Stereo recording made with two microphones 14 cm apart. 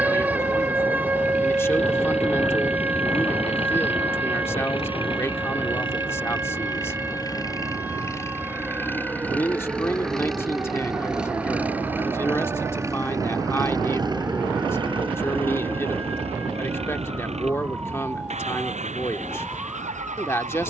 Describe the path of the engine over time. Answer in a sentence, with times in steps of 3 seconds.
You can hear the engine on the left from 0 s, in the centre from 9 s and on the right from 12 s.